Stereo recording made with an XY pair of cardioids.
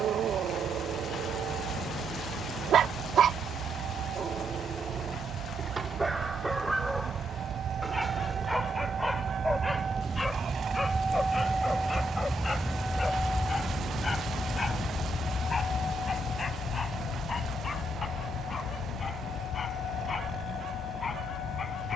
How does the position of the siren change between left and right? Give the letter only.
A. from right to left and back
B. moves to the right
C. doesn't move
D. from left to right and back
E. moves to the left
E.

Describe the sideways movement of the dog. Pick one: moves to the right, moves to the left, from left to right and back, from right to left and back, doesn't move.
moves to the left.